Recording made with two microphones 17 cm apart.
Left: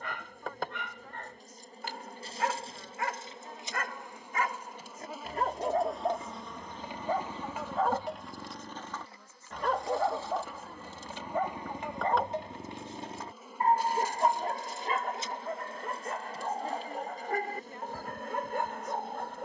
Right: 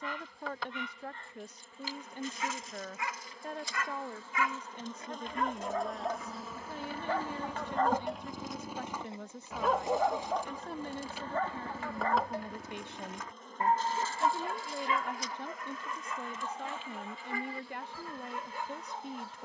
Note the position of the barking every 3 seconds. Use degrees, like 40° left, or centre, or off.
60° left, 40° left, 10° left, 10° left, 30° left, 50° left, 60° left.